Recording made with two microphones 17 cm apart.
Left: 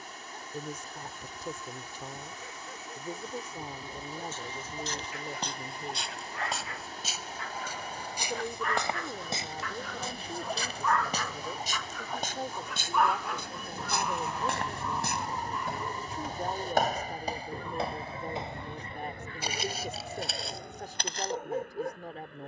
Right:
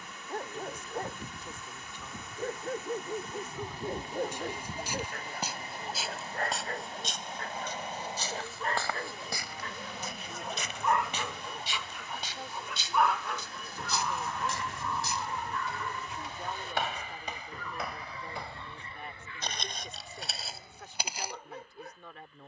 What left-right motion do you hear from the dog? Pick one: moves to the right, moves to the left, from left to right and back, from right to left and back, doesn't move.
moves to the left.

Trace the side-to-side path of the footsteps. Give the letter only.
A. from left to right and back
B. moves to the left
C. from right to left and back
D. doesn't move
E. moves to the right
C.